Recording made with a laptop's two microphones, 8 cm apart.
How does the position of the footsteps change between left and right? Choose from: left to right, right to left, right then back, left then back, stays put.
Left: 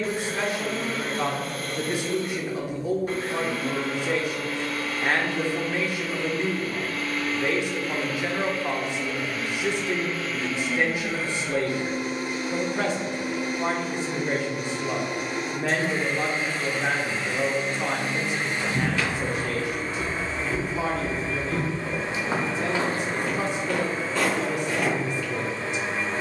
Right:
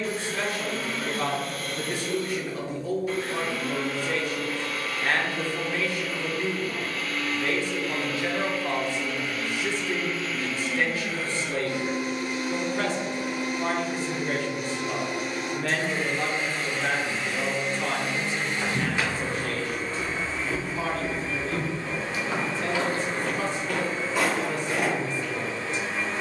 left then back.